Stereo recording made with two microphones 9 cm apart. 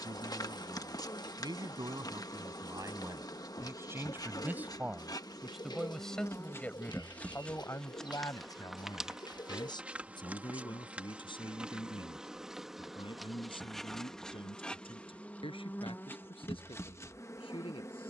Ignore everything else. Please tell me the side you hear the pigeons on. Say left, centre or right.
left.